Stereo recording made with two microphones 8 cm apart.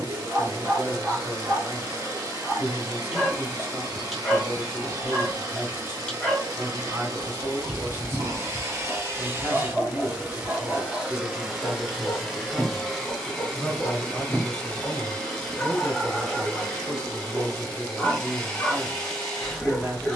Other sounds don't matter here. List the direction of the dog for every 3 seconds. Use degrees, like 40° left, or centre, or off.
20° right, centre, 10° left, 10° left, 10° left, 10° left, 10° left.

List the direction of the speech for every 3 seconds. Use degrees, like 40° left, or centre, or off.
30° right, 30° right, 30° right, 30° right, centre, 10° right, 30° right.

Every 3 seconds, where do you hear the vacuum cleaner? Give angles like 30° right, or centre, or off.
50° right, 50° right, 50° right, 20° right, 10° left, 10° left, 10° left.